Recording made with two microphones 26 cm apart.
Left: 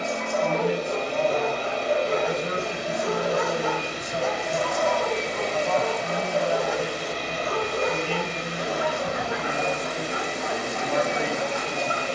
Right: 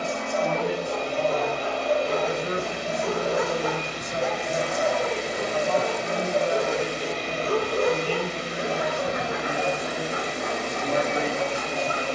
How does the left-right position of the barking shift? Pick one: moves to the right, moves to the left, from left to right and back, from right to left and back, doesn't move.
moves to the right.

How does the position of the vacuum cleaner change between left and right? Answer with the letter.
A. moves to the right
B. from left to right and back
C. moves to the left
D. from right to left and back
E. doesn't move
B.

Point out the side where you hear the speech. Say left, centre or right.
right.